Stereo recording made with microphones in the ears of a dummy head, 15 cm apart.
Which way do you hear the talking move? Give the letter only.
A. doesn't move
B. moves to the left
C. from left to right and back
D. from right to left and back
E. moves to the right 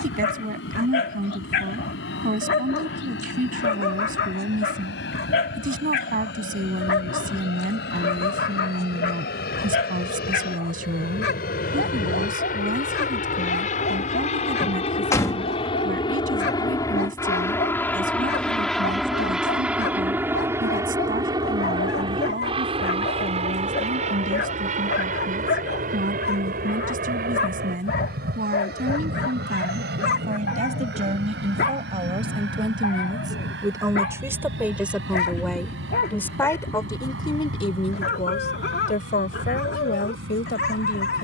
B.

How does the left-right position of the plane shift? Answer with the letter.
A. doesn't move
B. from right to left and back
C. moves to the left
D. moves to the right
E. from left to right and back
D.